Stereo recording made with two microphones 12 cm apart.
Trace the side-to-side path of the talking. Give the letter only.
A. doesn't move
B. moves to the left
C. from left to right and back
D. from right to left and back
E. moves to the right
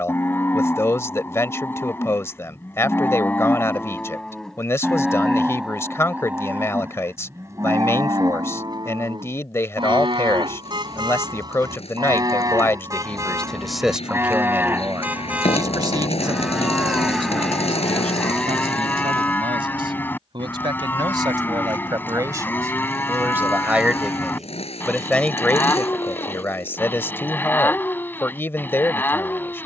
C.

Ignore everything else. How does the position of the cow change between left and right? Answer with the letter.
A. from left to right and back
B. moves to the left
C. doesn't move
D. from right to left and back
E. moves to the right
A.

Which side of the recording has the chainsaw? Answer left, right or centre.
left.